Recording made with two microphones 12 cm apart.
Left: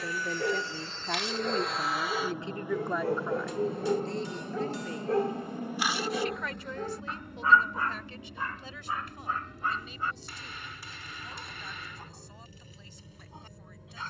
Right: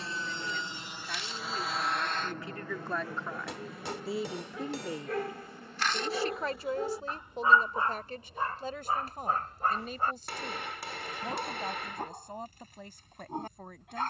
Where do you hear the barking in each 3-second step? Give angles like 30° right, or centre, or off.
70° left, 40° left, 20° right, 50° right, 50° right.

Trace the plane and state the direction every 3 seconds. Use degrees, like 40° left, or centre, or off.
centre, 30° left, 60° left, 70° left, 70° left.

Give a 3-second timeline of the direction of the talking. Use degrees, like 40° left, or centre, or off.
40° left, 10° right, 40° right, 50° right, 50° right.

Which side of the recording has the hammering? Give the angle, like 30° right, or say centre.
70° right.